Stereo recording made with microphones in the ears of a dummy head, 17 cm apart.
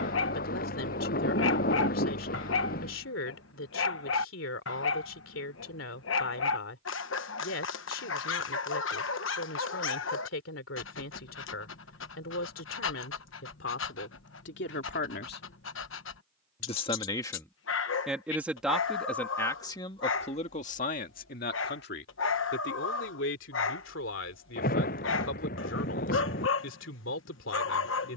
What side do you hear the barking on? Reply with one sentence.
You can hear the barking on the left.